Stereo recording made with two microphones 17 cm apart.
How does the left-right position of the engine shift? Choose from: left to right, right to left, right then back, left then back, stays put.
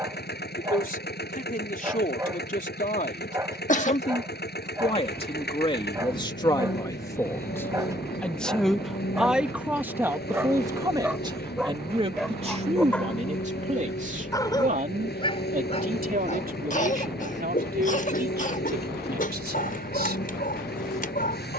stays put.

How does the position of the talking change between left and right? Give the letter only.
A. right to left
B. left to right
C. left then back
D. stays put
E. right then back
B.